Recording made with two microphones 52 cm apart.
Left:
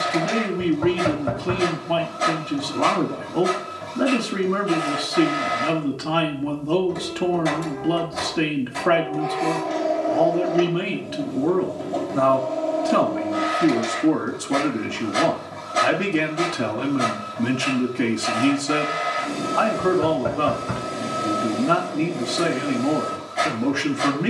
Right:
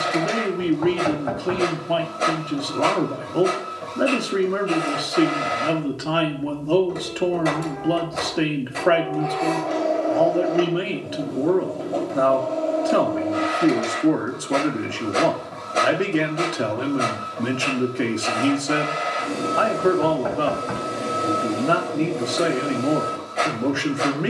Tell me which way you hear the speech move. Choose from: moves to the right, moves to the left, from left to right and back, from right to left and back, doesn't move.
doesn't move.